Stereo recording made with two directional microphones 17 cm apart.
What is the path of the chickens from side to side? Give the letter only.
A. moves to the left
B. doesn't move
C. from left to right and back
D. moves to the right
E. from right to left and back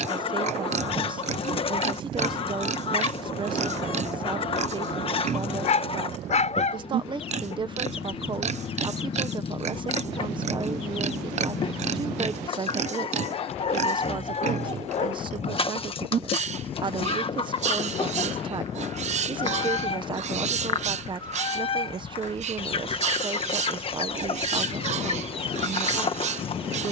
B.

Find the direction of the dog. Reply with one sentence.
You can hear the dog on the left.